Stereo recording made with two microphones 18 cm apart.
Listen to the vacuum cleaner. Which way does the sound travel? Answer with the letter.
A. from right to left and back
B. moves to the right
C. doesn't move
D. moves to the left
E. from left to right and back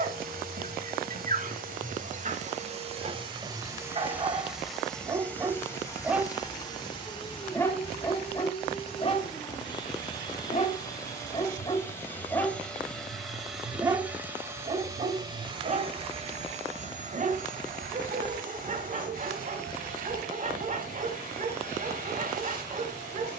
A.